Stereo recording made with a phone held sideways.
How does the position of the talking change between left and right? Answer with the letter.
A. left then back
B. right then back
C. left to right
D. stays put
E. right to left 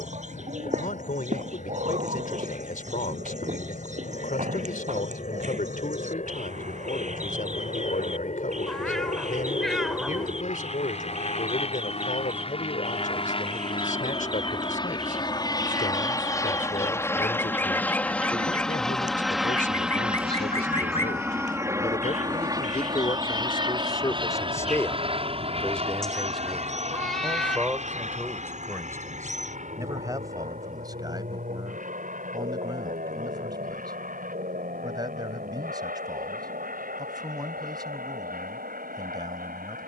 C.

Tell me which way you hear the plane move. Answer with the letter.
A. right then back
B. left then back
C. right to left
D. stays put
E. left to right
E.